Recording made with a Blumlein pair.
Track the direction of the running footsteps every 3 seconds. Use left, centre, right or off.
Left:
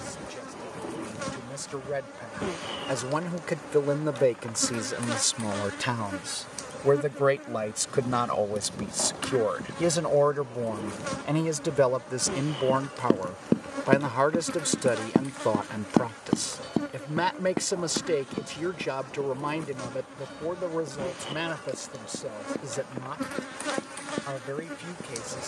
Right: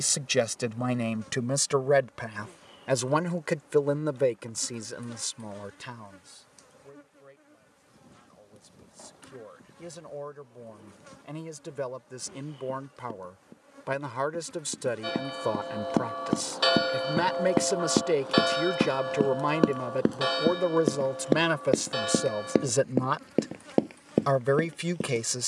off, off, off, off, left, centre, right, right, right.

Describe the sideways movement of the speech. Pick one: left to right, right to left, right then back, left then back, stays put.
left then back.